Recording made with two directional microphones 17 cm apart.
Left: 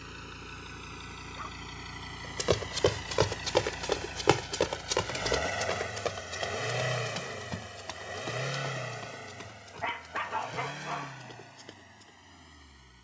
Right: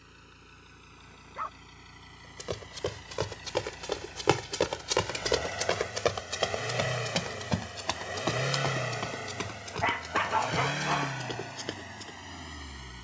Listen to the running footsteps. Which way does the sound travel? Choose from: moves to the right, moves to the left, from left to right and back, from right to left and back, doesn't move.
moves to the right.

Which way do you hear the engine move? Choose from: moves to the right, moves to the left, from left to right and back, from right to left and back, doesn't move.
moves to the right.